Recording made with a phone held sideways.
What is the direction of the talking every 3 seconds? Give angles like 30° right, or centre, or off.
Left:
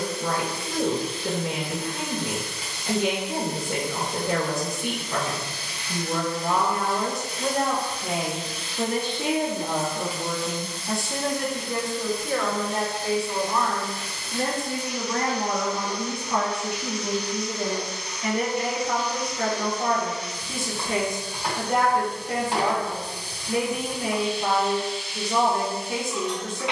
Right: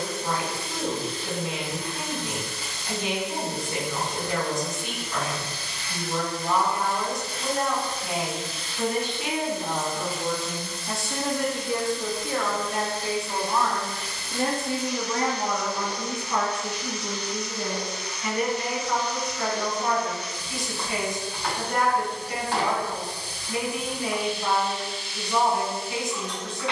60° left, 60° left, 50° left, 10° left, 10° right, 10° left, 40° left, 40° left, 40° left.